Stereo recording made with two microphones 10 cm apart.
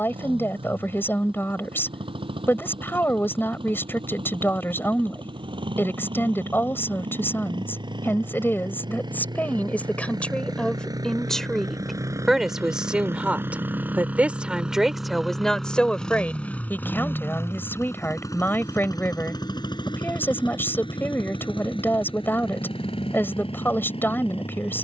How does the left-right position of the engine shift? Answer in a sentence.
In this clip you hear the engine move to the left.